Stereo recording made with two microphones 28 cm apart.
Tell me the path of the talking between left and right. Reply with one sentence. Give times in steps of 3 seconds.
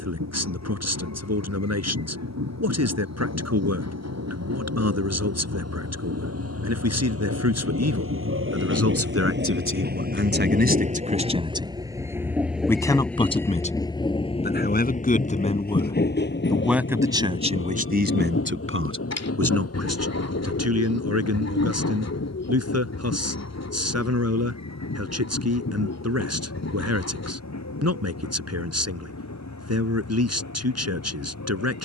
In this clip you hear the talking on the right from 0 s, on the left from 12 s, in the centre from 15 s and on the right from 18 s.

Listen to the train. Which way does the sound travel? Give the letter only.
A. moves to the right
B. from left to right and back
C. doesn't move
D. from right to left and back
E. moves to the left
E.